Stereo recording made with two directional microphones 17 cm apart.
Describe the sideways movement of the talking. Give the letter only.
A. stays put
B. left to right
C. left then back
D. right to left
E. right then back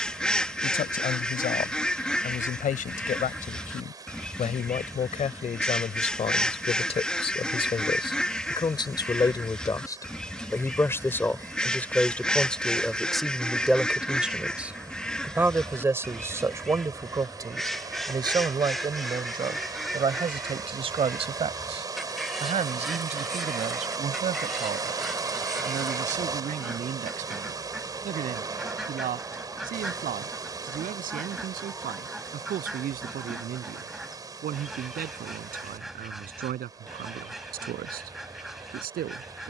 B.